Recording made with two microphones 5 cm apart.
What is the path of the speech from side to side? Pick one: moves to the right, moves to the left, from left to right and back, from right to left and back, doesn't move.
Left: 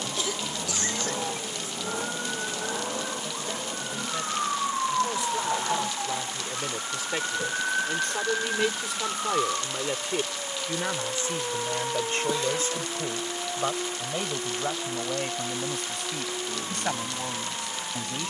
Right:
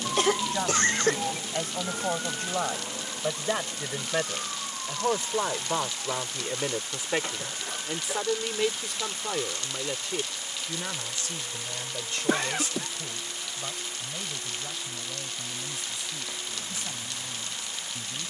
moves to the left.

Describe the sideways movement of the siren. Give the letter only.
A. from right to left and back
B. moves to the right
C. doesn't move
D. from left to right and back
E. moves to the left
E.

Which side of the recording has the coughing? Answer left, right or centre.
right.